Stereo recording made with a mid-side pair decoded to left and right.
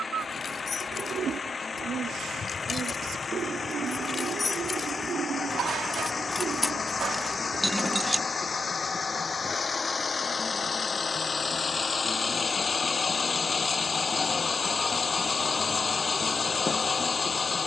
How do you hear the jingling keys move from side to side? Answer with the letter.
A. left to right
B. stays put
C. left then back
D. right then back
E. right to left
A.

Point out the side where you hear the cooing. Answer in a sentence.
You can hear the cooing on the right.